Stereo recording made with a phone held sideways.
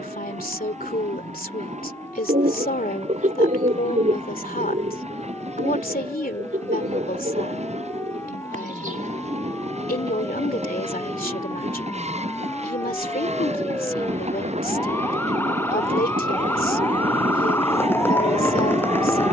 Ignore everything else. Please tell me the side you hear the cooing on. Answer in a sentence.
You can hear the cooing on the right.